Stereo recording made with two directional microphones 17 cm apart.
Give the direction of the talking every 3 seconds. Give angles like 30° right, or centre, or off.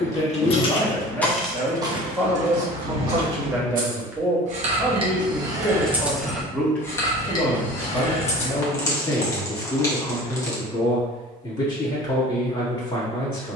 centre, 10° right, 10° left, 20° left, 30° left.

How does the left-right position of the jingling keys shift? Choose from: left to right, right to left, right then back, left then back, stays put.
right then back.